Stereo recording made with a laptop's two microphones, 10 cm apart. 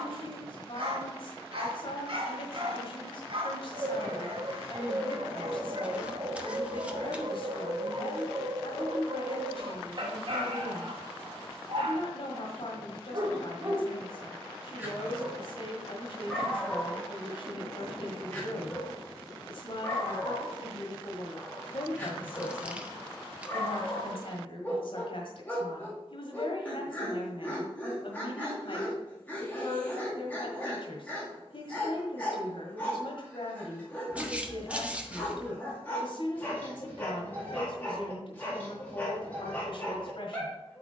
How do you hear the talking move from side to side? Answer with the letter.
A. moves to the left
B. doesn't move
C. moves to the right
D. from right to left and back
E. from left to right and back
B.